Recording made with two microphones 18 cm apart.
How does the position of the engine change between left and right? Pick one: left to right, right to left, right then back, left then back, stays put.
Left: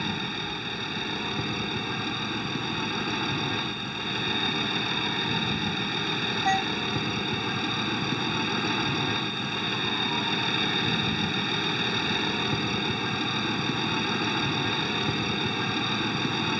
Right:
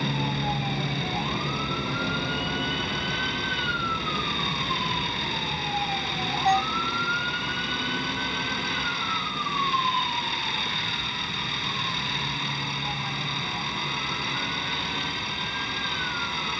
stays put.